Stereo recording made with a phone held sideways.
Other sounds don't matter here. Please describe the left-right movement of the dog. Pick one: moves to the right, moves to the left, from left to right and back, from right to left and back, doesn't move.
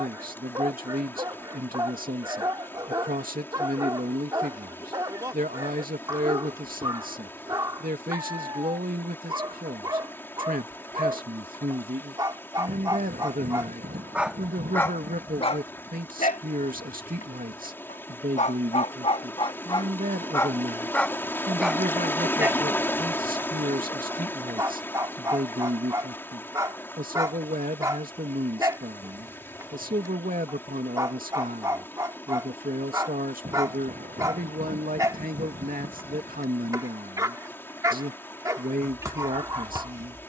from right to left and back.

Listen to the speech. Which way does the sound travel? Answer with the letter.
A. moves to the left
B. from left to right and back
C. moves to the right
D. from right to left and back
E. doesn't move
E.